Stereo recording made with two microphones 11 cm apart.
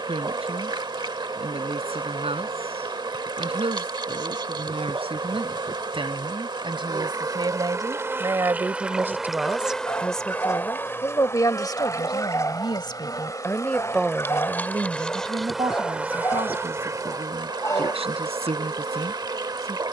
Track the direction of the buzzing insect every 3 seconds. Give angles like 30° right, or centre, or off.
50° right, 50° right, 30° right, 10° left, 30° left, 20° right, 40° right.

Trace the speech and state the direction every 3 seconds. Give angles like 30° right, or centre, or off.
70° right, 60° right, 40° right, 10° left, 10° left, 60° right, 70° right.